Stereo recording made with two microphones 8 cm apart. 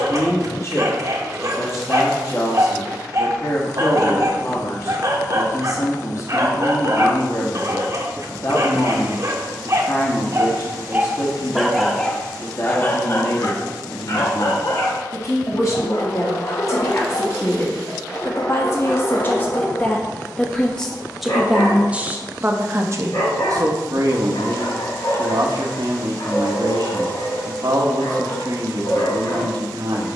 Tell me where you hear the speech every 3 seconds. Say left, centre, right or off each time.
left, left, left, left, left, left, left, right, right, right.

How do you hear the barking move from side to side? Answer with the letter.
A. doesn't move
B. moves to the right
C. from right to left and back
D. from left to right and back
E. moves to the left
E.